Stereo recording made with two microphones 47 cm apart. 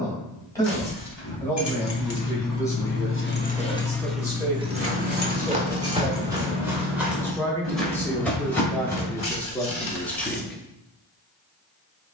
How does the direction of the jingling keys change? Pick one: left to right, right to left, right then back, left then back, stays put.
left to right.